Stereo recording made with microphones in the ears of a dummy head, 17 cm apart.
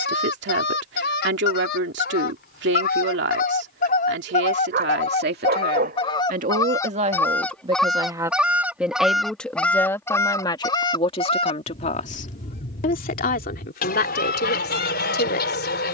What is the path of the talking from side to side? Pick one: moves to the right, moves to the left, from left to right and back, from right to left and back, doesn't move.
moves to the left.